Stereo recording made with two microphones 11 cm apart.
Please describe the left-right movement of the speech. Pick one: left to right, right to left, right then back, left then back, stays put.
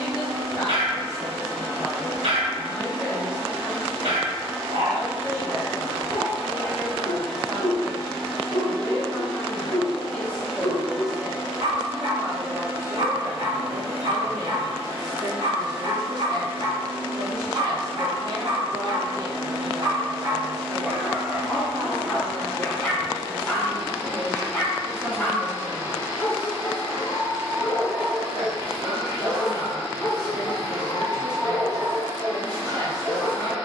left to right.